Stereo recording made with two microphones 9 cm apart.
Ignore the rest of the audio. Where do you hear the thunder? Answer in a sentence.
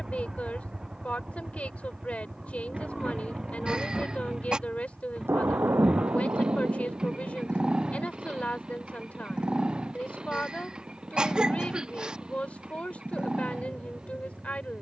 You can hear the thunder on the right.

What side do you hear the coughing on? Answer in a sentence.
You can hear the coughing in the centre.